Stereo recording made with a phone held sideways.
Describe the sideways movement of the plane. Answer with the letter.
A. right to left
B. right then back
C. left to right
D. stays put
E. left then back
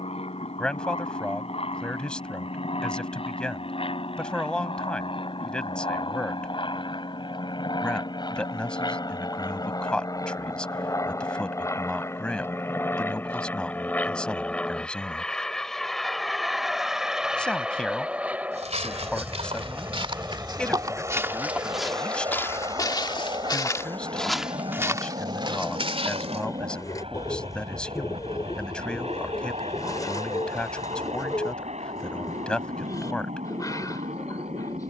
C.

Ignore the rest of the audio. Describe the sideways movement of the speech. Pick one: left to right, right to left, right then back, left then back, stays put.
stays put.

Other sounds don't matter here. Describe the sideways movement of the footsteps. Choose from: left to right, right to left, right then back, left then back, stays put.
left then back.